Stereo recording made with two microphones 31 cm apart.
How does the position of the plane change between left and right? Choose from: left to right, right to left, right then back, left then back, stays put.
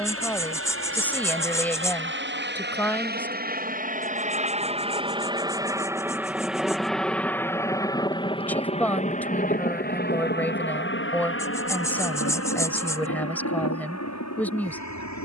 right to left.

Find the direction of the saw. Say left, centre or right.
centre.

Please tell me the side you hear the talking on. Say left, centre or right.
centre.